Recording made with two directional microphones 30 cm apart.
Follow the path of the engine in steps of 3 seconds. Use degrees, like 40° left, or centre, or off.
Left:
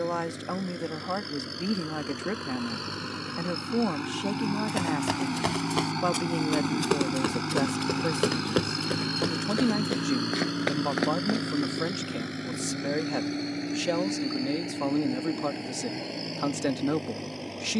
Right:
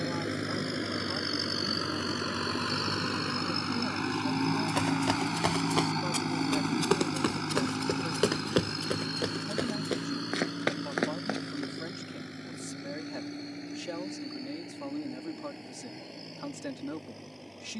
40° right, 20° right, 20° left, 40° left, 60° left, 70° left.